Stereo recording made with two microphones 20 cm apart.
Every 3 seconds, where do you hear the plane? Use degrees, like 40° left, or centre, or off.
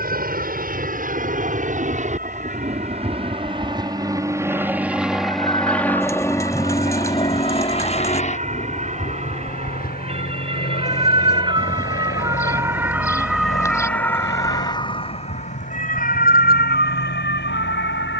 50° right, 10° right, 30° left, 50° left, 60° left, 70° left.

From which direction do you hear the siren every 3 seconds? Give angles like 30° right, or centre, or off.
50° right, 50° right, 50° right, 30° right, centre, 50° left.